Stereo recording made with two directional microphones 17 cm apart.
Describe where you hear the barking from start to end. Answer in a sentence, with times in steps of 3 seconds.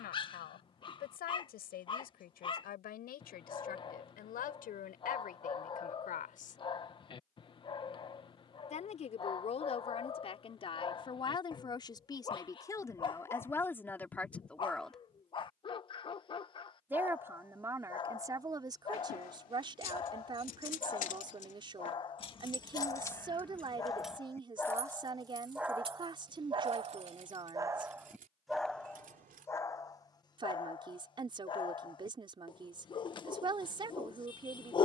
In this clip you hear the barking on the left from 0 s, in the centre from 24 s and on the left from 30 s.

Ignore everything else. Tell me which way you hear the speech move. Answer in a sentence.
In this clip you hear the speech move to the right.